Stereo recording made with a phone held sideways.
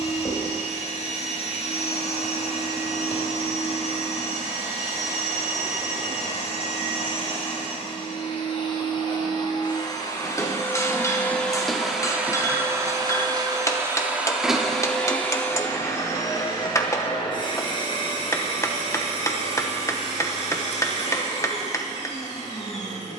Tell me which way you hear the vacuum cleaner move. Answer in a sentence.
You can hear the vacuum cleaner go right and come back.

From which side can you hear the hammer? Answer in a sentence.
You can hear the hammer on the left.